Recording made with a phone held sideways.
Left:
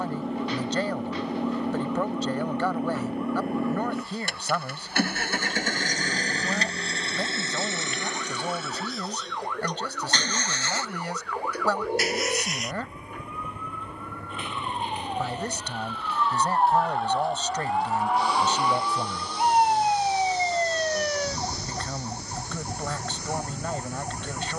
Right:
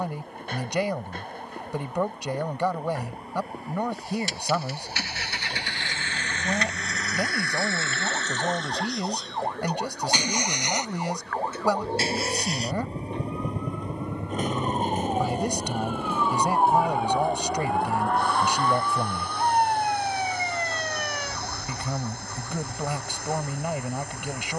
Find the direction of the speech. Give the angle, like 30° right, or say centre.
10° right.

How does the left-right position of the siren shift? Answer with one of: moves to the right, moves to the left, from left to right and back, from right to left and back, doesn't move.
moves to the left.